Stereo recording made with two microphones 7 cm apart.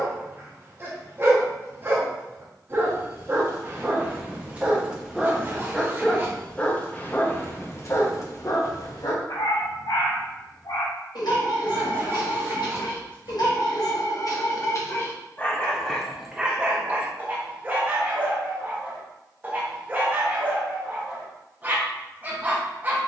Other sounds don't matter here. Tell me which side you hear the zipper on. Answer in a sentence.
In this clip you hear the zipper on the right.